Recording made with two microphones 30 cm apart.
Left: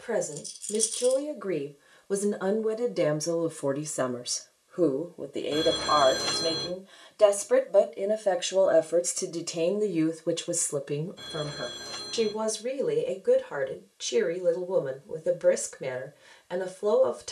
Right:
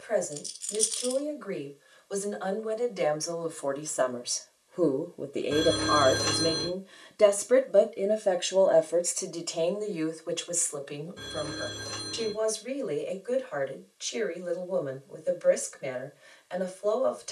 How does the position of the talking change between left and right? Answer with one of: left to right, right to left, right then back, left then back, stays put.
right then back.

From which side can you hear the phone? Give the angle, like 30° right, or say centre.
70° right.